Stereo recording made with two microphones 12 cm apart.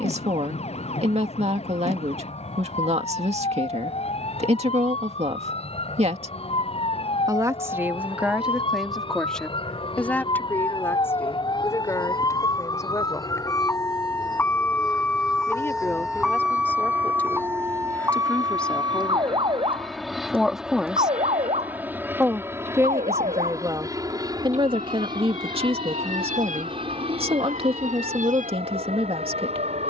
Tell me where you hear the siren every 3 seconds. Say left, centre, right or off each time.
left, left, left, left, left, centre, right, right, right, right.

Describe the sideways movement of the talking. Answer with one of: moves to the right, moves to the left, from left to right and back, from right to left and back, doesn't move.
from right to left and back.